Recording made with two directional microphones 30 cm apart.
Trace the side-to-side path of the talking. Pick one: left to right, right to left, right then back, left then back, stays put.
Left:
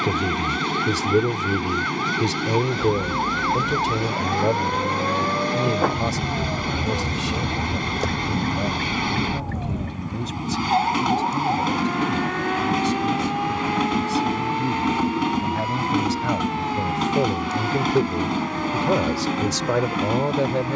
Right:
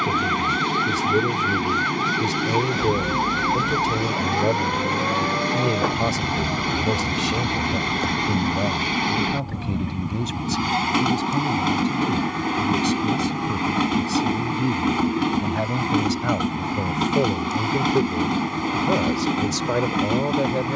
right then back.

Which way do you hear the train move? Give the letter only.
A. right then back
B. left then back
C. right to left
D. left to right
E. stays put
E.